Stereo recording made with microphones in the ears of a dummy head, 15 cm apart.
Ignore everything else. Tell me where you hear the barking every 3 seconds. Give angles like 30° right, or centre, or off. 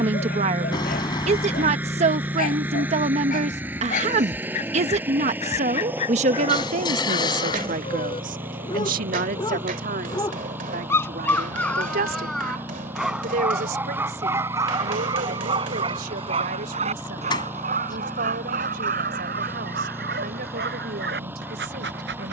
50° left, 40° left, 30° left, 10° left, 10° right, 30° right, 50° right, 60° right.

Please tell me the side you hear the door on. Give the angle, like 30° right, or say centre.
30° left.